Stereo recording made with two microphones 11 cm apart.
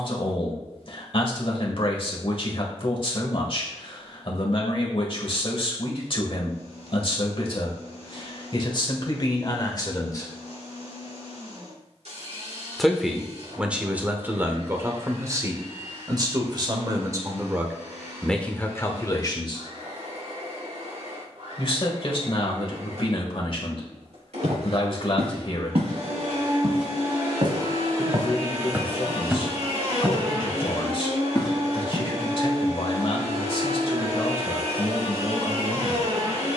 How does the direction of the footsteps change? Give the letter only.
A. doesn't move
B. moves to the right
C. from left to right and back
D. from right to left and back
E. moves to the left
E.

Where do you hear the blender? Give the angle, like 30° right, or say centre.
70° right.